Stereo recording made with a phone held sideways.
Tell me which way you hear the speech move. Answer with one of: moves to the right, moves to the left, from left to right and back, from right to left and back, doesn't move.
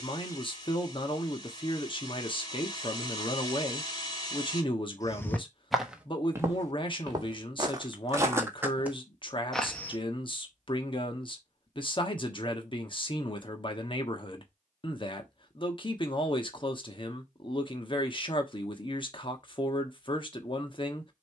doesn't move.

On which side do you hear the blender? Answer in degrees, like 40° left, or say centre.
30° left.